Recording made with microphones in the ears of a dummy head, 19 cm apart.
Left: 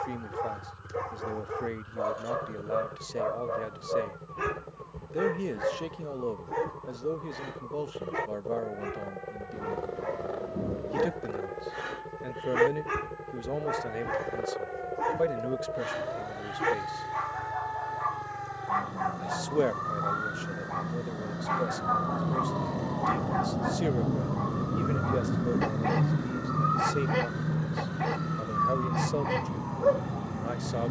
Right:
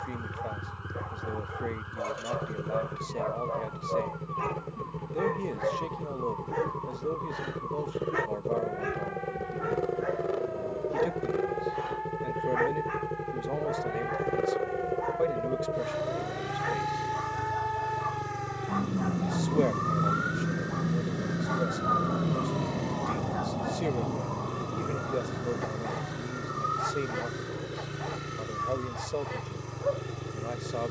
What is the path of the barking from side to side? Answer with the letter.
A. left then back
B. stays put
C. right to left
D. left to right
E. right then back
E.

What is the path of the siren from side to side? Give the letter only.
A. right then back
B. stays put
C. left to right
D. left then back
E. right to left
E.